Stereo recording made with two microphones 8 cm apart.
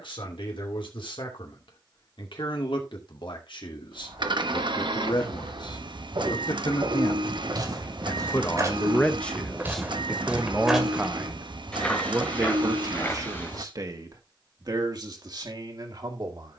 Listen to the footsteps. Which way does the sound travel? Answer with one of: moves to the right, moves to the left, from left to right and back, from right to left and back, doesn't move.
moves to the left.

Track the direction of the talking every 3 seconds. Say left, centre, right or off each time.
left, left, left, centre, right, right.